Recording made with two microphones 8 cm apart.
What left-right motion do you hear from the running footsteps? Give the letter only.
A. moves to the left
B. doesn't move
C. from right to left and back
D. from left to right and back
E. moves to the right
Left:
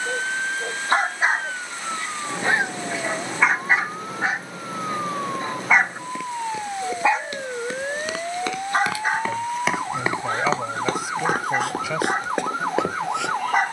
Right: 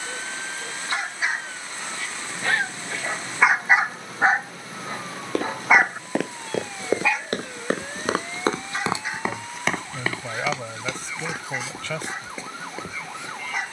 A.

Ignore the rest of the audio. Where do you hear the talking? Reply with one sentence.
You can hear the talking in the centre.